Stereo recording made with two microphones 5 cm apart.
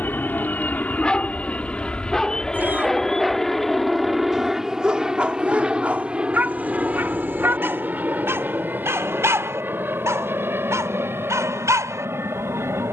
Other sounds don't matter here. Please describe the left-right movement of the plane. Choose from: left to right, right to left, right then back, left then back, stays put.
left to right.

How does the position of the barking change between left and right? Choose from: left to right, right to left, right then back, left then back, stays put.
left to right.